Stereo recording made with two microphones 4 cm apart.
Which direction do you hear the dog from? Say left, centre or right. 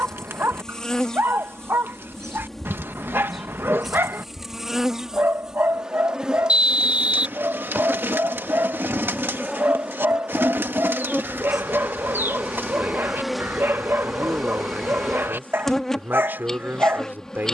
right.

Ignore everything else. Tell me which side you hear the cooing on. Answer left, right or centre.
right.